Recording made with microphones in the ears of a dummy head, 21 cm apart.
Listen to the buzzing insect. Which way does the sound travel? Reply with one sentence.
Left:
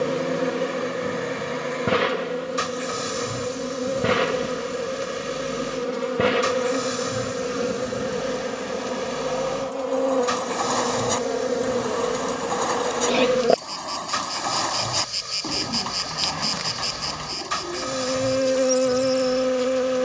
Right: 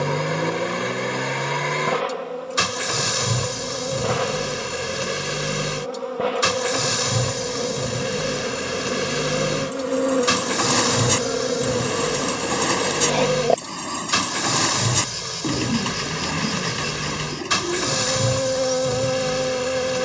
In this clip you hear the buzzing insect go right and come back.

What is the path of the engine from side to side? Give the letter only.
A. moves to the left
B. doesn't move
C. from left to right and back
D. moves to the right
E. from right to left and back
B.